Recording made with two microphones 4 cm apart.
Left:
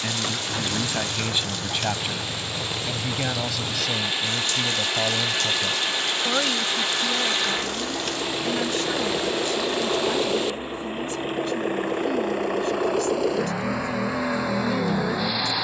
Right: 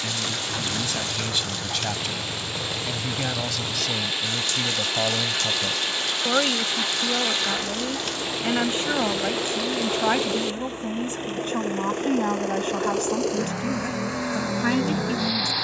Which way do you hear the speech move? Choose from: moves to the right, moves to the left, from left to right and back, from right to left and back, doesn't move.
moves to the right.